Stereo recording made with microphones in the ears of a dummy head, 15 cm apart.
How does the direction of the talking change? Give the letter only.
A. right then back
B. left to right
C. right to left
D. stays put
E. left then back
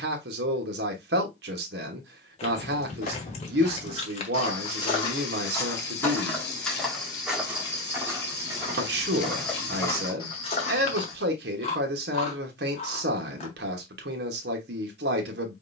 D.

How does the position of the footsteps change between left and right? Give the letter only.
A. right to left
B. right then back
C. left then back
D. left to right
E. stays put
B.